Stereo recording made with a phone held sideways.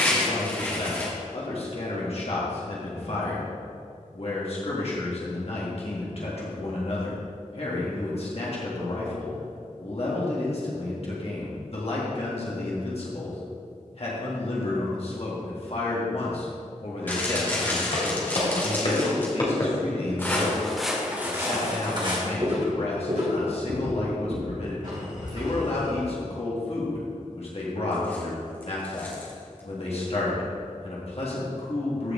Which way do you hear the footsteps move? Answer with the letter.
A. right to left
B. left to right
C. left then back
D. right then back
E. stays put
B.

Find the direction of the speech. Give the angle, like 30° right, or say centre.
50° left.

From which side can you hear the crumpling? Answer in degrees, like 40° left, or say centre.
10° left.